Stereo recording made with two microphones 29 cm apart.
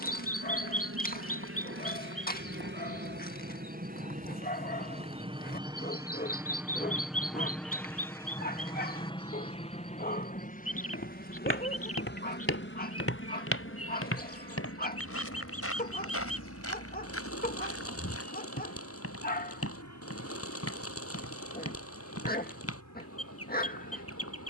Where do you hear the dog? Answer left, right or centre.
left.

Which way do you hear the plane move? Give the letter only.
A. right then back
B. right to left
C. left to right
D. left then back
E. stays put
B.